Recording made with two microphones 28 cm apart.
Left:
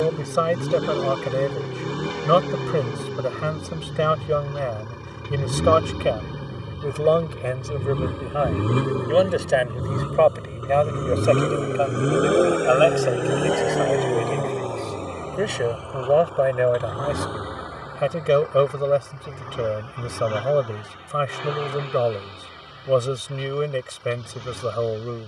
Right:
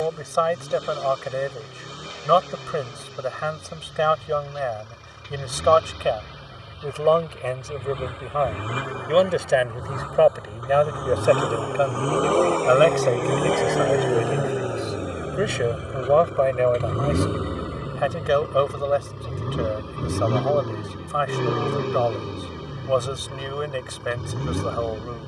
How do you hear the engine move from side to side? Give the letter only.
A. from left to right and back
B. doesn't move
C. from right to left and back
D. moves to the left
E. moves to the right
E.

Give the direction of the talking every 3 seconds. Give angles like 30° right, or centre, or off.
30° left, 30° left, 20° left, 10° right, 20° right, 10° left, 30° left, 30° left, 30° left.